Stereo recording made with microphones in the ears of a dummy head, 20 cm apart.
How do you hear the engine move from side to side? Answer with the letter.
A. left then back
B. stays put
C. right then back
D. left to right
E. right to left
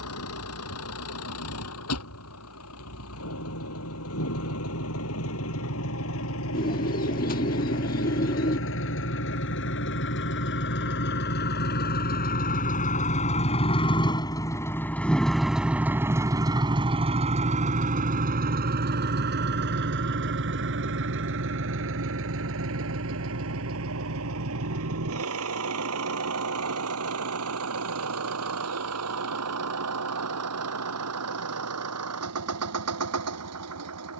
D.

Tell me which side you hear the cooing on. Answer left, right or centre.
left.